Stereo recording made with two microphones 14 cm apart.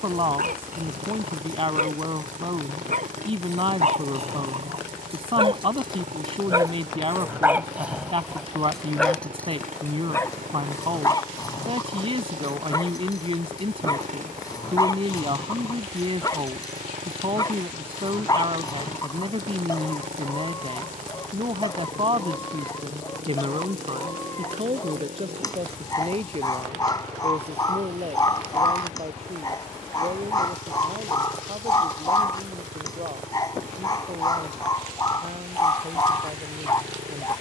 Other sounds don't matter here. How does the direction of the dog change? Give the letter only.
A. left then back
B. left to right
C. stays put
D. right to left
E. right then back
D.